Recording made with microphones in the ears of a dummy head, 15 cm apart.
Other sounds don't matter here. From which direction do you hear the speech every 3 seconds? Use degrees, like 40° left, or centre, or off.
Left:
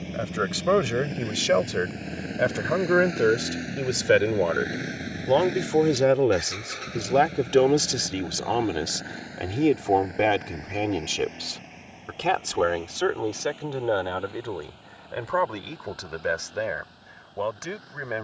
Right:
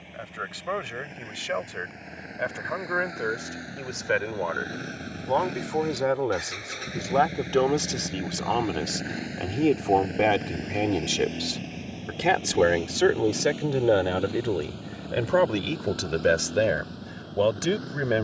50° left, 40° left, 20° left, centre, 20° right, 40° right.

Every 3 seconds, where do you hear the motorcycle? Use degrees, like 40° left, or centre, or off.
40° left, 20° left, 10° right, 30° right, 50° right, 60° right.